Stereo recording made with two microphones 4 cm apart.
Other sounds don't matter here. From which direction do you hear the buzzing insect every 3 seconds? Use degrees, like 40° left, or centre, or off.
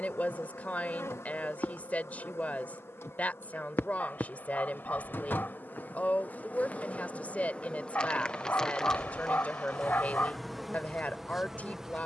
70° left, 50° left, 30° left, centre.